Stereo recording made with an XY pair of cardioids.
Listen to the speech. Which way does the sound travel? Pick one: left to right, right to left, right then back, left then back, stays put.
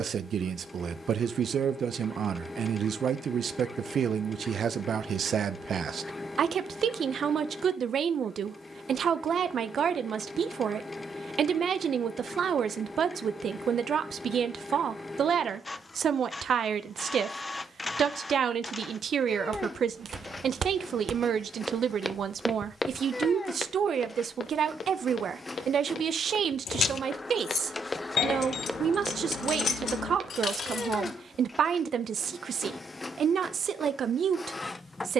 stays put.